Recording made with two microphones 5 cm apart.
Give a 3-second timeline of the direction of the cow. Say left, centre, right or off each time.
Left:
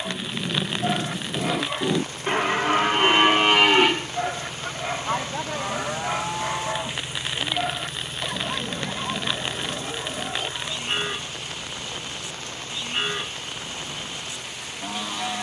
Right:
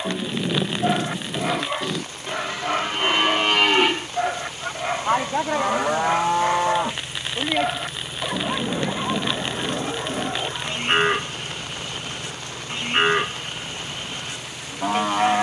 centre, centre, right, right, right.